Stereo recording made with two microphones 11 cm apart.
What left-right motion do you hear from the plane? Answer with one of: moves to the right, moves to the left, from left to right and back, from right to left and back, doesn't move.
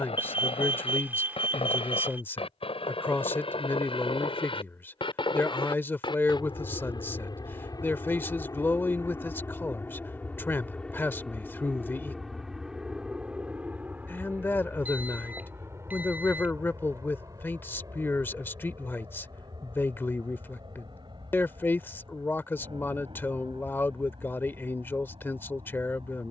moves to the right.